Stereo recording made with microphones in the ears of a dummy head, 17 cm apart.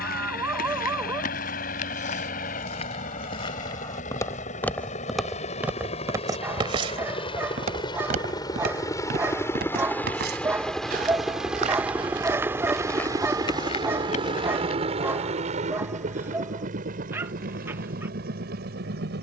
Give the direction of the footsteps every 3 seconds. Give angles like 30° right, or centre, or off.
50° left, 10° left, 40° right, 50° right, 20° left, off, off.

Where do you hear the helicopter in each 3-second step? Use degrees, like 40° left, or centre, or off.
50° left, 40° left, 30° left, centre, 20° right, 40° right, 50° right.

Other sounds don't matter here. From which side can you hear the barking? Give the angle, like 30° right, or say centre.
10° right.